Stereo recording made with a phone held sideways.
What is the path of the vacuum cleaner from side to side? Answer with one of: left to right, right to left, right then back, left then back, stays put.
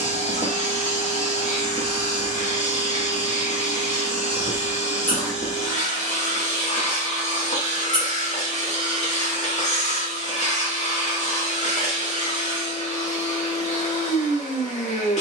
stays put.